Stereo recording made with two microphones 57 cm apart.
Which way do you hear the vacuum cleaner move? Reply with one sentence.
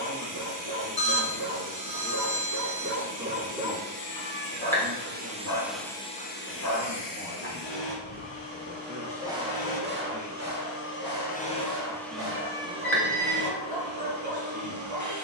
You can hear the vacuum cleaner go left and come back.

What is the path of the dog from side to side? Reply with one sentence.
You can hear the dog go left and come back.